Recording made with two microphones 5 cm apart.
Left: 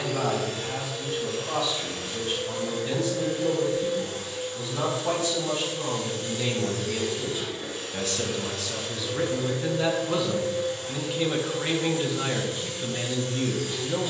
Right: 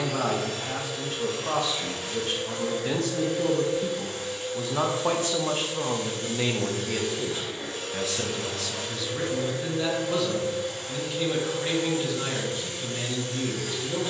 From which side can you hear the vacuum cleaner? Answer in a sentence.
In this clip you hear the vacuum cleaner on the right.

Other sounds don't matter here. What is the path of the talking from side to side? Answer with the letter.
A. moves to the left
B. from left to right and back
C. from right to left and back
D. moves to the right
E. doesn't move
A.